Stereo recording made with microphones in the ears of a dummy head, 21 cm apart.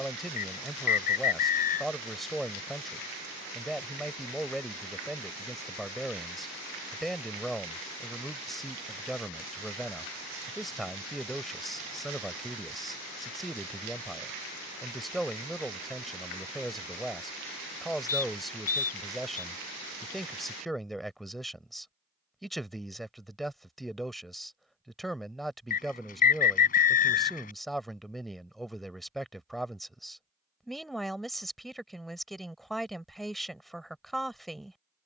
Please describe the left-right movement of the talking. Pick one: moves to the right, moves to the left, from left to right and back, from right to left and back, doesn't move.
doesn't move.